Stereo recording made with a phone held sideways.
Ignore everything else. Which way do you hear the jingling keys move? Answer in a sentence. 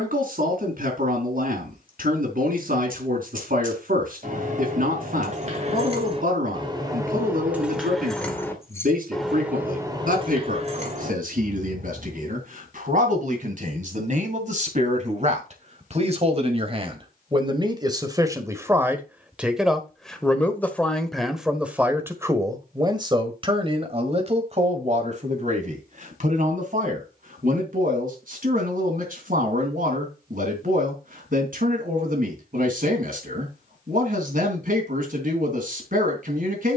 You can hear the jingling keys go left and come back.